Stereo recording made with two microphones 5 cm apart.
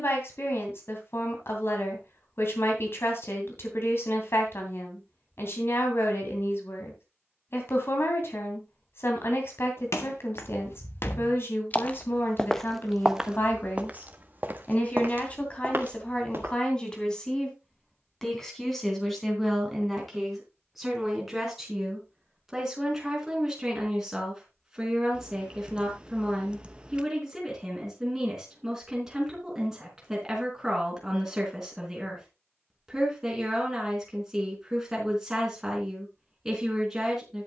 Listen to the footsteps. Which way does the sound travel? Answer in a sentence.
You can hear the footsteps move from left to right.